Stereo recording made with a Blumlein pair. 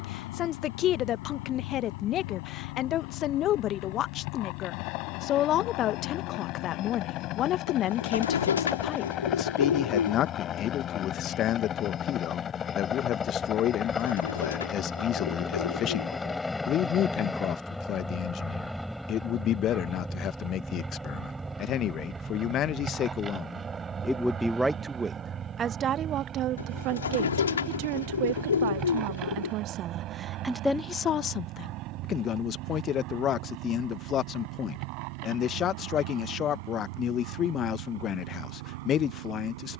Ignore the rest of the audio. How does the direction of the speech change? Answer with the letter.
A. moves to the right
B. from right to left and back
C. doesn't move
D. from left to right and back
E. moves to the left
D.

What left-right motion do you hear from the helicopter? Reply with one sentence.
In this clip you hear the helicopter move from left to right.